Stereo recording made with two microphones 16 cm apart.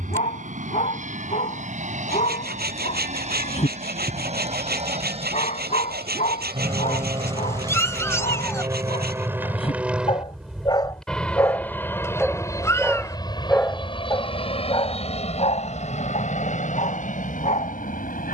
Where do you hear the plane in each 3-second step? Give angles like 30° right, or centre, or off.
60° right, 50° right, 30° right, centre, 30° left, 50° left.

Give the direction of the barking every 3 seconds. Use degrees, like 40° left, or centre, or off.
50° left, 50° left, 50° left, 30° left, 10° left, 50° left.